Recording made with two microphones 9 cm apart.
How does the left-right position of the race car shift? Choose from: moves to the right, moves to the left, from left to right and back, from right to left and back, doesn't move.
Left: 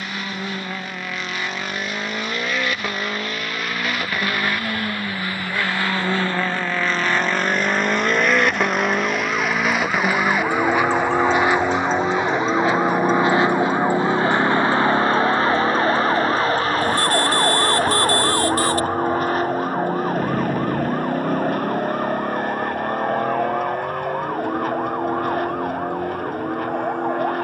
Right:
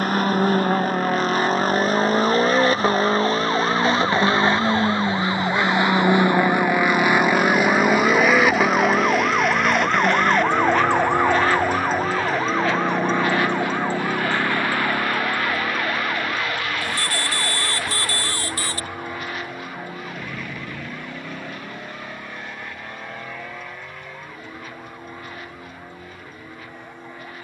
moves to the left.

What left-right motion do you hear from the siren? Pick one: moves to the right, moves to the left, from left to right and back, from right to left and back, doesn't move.
moves to the left.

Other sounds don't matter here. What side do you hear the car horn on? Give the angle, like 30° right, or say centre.
50° left.